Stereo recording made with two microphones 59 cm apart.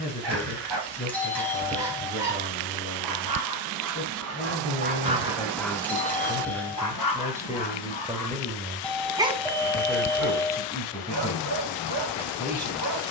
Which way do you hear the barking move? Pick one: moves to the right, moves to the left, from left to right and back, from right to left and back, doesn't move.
from right to left and back.